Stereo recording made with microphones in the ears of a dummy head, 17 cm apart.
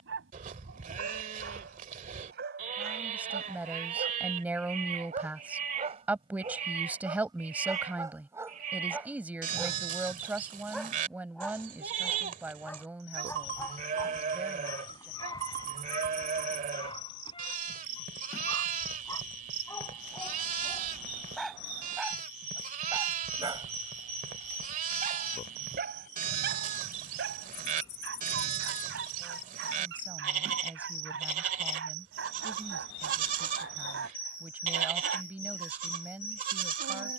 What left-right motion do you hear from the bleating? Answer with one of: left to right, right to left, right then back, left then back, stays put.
stays put.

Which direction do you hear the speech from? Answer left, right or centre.
centre.